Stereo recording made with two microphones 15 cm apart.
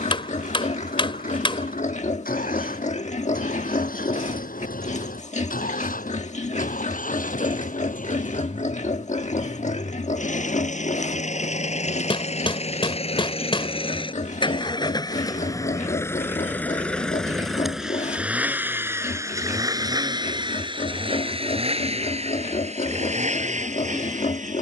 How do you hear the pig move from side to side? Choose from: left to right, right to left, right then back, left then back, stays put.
stays put.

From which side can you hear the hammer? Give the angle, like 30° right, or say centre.
30° left.